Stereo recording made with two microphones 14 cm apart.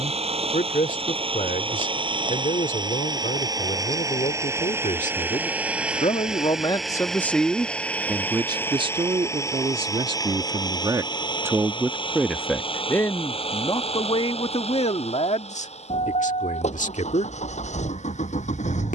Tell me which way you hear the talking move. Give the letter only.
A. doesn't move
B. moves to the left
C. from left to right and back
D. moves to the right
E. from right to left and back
C.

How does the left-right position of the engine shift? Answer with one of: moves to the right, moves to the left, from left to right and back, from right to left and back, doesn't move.
moves to the left.